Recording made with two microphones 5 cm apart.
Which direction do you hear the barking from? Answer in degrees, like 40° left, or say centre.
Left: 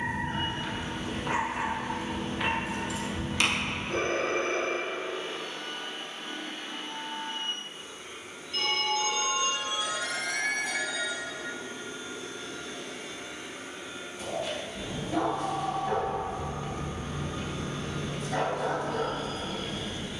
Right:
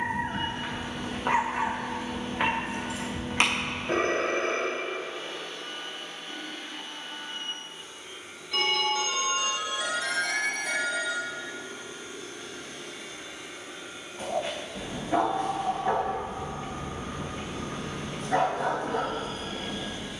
40° right.